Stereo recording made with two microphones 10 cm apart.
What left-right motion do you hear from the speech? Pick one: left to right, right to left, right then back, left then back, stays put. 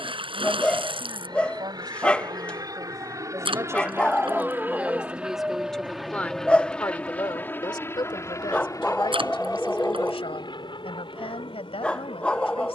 right to left.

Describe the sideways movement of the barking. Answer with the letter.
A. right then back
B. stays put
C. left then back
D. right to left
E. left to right
B.